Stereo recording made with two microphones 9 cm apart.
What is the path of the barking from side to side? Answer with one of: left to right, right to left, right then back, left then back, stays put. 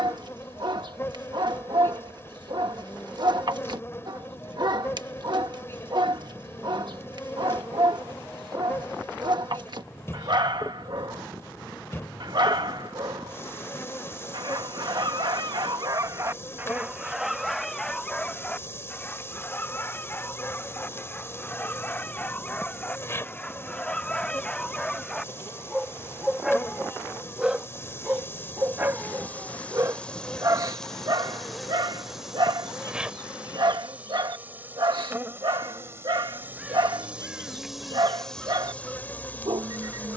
left then back.